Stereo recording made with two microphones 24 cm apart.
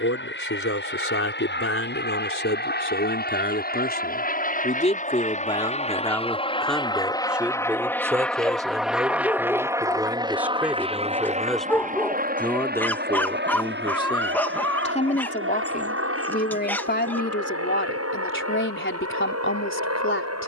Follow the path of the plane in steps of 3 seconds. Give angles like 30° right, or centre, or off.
50° left, 40° left, 10° left, 20° right, 40° right, 60° right, 70° right.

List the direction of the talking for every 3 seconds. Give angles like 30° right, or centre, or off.
60° left, 30° left, 10° right, 10° right, 20° left, 40° left, 50° left.